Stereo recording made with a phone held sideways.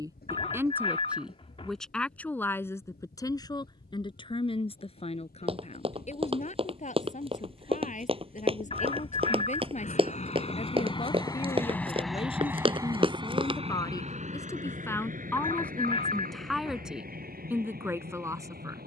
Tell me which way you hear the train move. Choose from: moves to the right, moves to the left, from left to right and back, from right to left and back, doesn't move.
moves to the right.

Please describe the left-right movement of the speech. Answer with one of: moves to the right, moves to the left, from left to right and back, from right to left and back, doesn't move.
from right to left and back.